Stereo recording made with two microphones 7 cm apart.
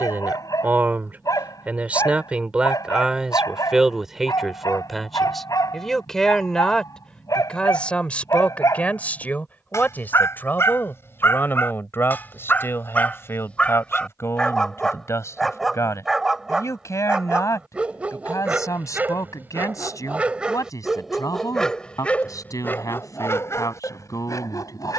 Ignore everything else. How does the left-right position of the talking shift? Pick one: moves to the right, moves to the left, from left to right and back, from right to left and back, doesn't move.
moves to the left.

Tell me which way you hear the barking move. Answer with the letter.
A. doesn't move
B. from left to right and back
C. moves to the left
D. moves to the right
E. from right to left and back
B.